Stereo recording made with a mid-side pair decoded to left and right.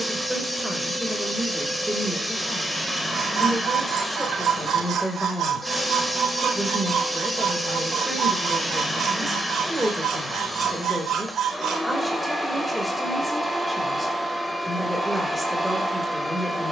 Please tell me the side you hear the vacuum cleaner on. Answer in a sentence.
You can hear the vacuum cleaner in the centre.